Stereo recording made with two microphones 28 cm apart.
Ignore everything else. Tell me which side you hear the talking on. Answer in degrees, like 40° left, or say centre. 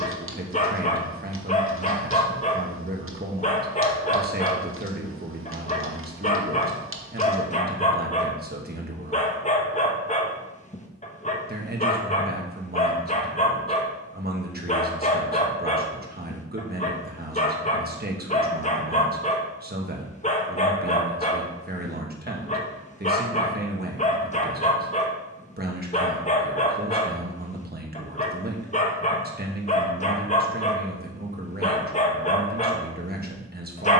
30° right.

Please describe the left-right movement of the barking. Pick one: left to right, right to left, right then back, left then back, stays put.
stays put.